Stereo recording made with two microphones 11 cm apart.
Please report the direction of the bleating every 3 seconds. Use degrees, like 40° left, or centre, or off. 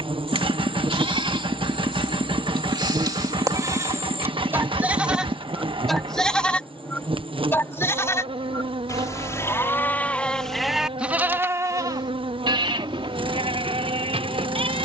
60° right, 20° right, 20° left, centre, 70° right.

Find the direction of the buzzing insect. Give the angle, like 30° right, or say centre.
60° right.